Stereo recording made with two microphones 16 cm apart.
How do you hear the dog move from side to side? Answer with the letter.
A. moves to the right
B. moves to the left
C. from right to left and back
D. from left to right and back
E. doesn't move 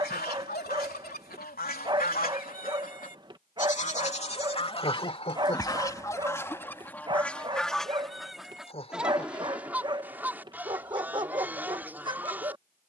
E.